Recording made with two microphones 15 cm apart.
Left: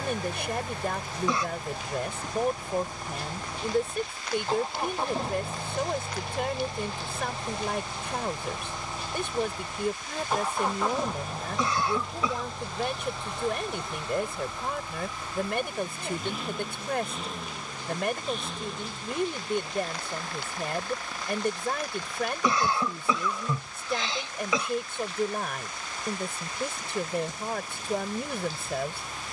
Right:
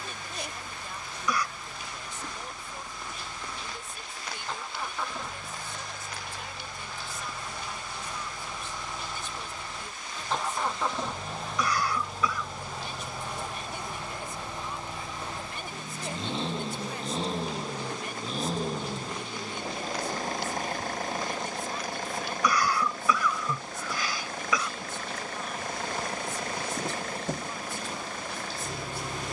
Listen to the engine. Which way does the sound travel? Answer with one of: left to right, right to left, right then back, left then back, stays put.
left to right.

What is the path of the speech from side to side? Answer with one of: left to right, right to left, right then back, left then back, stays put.
stays put.